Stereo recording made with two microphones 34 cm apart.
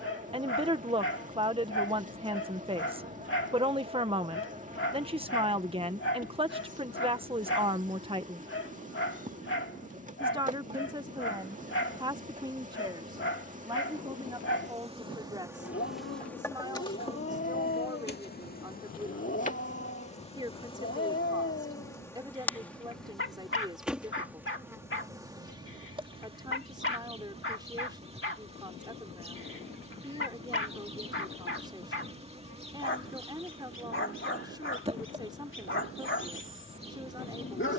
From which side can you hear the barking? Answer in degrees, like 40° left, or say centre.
40° left.